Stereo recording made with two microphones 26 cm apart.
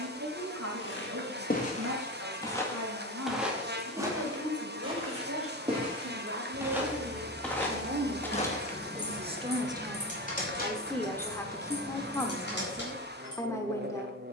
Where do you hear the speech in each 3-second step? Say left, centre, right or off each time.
right, right, right, centre, centre.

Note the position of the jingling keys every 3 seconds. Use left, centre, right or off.
off, off, centre, left, left.